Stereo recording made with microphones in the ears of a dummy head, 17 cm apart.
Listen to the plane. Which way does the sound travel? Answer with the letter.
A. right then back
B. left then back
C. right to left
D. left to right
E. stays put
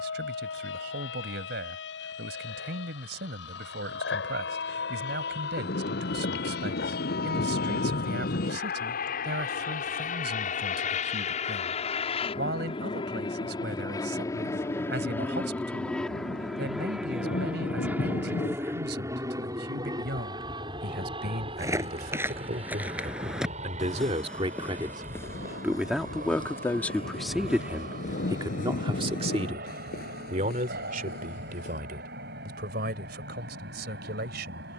D.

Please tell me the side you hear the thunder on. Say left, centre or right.
left.